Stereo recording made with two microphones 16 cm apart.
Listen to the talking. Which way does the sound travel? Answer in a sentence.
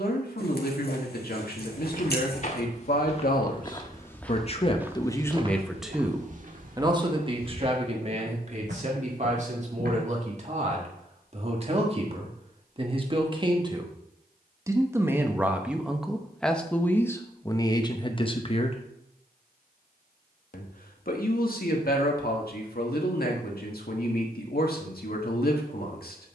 In this clip you hear the talking move from left to right and back again.